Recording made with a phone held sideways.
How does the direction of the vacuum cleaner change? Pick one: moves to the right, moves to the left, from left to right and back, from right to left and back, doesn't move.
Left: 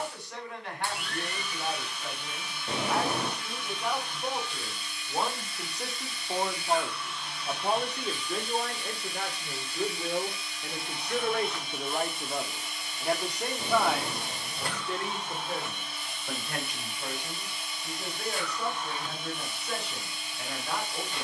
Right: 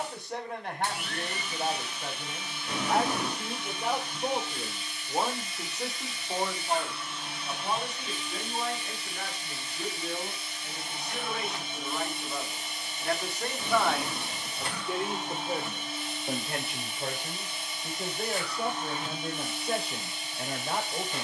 doesn't move.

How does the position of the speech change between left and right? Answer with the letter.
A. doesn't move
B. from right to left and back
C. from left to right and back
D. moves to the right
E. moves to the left
B.